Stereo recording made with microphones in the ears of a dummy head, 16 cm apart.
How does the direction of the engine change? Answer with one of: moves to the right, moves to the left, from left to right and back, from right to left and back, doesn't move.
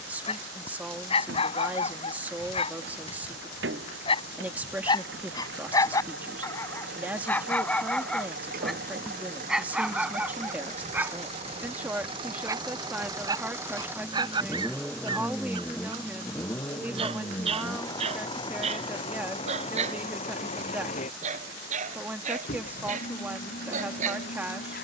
moves to the left.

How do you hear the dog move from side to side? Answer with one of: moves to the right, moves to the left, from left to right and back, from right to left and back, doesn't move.
moves to the right.